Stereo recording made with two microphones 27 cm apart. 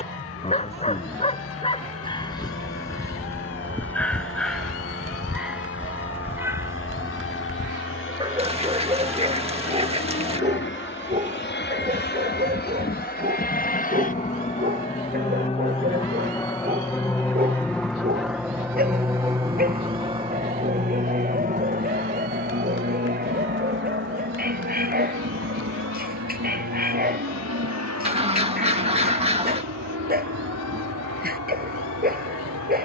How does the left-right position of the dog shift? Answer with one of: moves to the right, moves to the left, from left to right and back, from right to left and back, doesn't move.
moves to the right.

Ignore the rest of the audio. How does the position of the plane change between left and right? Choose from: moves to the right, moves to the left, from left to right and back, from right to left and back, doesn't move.
moves to the right.